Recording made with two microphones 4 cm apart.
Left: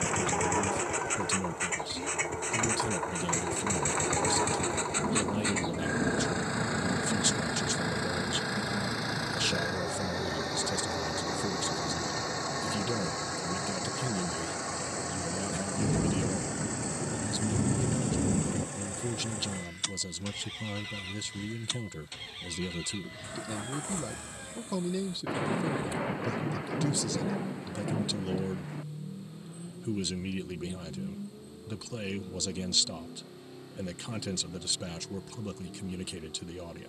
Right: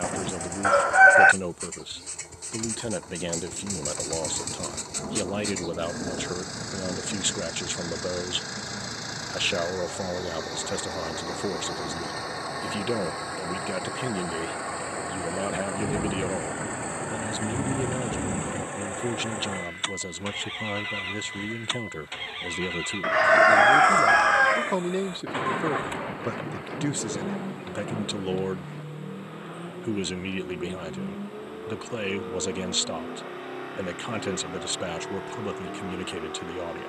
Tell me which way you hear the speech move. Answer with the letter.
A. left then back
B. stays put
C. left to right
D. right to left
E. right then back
B.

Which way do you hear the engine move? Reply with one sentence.
In this clip you hear the engine go from the left side to the right.